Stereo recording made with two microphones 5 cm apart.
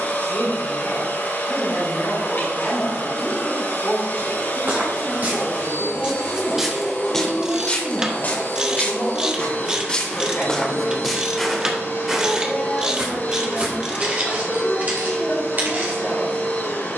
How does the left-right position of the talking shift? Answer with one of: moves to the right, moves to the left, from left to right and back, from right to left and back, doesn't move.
doesn't move.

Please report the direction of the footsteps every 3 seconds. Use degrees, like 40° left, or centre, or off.
off, 40° right, 20° left, 10° left, 30° right, 40° right.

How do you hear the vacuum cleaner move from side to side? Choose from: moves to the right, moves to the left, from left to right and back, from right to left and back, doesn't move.
doesn't move.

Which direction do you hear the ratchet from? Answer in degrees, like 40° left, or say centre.
20° right.